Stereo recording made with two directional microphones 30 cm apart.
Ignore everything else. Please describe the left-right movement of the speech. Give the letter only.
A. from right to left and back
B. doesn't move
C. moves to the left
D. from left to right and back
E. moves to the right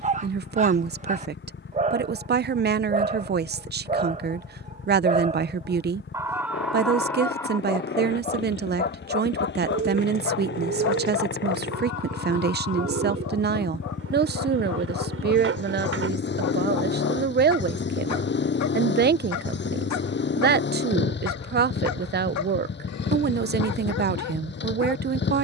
B.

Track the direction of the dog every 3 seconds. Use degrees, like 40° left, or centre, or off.
20° right, 20° right, 10° left, 50° left, 70° left, 70° left, 70° left, 70° left, 70° left.